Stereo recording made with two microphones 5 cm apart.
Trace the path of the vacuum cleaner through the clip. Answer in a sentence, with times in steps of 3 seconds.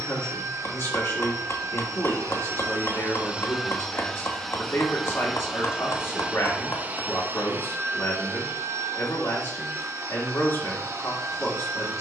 In this clip you hear the vacuum cleaner on the right from 0 s, in the centre from 3 s and on the right from 6 s.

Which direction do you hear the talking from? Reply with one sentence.
You can hear the talking on the left.